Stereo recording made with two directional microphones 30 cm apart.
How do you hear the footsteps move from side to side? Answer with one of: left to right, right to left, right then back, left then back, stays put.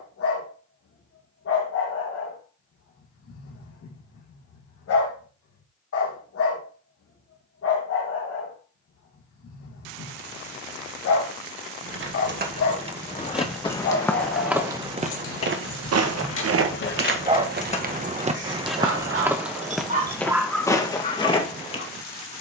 right then back.